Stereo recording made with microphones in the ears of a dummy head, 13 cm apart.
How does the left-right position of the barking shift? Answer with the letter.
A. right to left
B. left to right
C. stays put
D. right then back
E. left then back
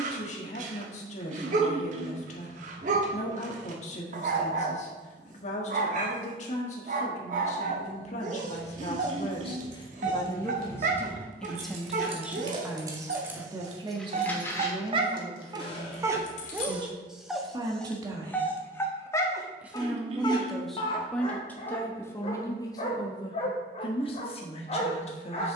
A.